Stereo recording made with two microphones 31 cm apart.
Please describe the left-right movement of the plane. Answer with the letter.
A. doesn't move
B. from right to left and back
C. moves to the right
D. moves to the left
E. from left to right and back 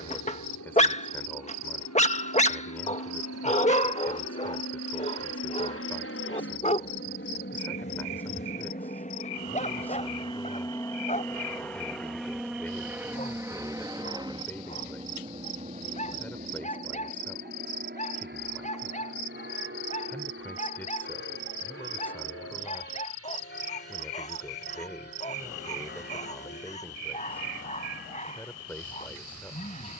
C.